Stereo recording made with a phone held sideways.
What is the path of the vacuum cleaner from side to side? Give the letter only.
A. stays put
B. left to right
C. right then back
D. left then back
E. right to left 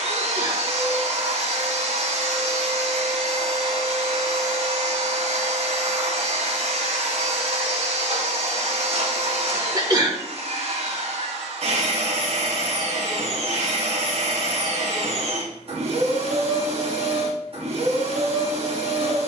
A.